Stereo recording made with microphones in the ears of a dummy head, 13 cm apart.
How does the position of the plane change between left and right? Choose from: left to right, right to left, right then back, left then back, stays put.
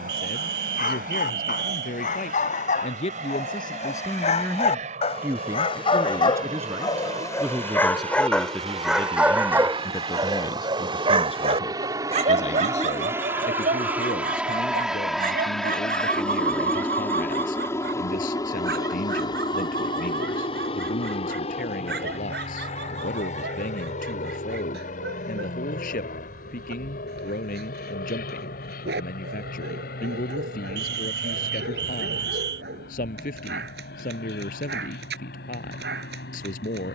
right to left.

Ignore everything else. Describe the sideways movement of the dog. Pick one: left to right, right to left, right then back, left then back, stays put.
left to right.